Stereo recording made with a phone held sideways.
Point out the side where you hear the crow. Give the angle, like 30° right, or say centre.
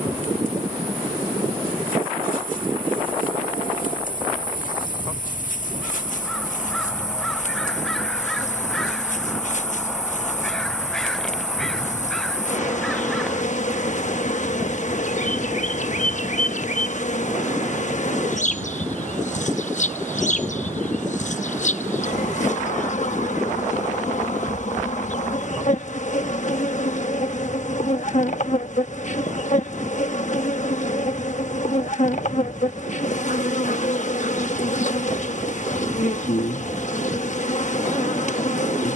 centre.